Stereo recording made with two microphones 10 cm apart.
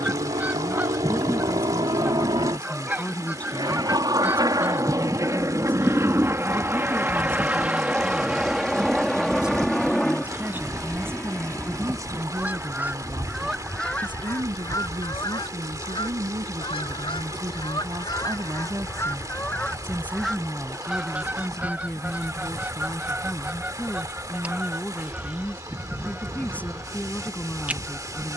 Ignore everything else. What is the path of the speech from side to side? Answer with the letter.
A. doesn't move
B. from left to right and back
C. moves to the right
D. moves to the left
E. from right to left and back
B.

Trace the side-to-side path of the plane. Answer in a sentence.
In this clip you hear the plane move from right to left.